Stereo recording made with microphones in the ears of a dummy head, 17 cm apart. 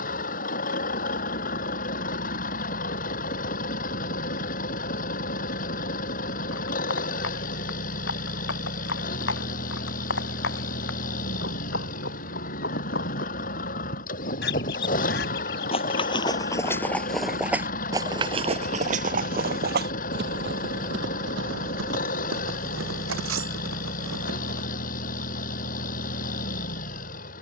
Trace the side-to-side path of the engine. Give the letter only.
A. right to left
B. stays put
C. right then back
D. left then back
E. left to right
B.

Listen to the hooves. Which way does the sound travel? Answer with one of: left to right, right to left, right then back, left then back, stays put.
left to right.